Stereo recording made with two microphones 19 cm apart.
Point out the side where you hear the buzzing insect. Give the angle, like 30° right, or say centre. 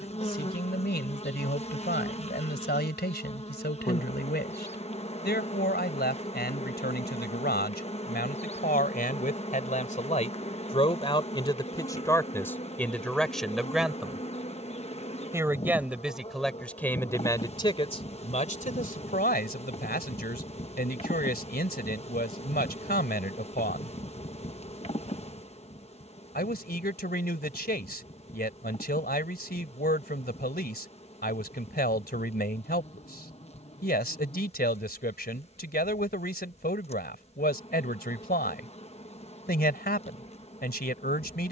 30° left.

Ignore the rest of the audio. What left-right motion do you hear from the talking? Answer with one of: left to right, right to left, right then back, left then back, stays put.
right then back.